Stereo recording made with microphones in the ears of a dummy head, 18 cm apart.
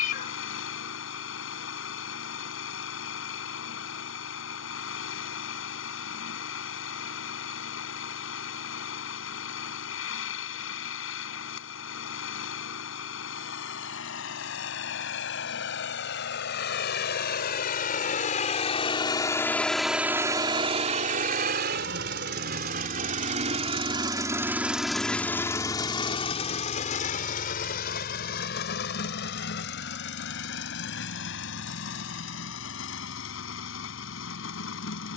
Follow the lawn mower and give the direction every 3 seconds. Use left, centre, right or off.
left, left, left, left, left, left, centre, right, centre, left, left, left.